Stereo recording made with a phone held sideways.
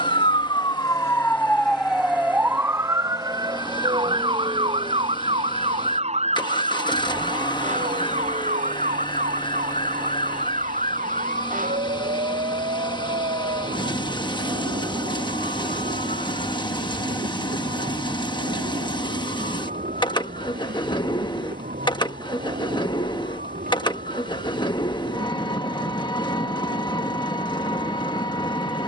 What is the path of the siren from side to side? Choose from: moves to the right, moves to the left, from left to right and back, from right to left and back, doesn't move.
moves to the right.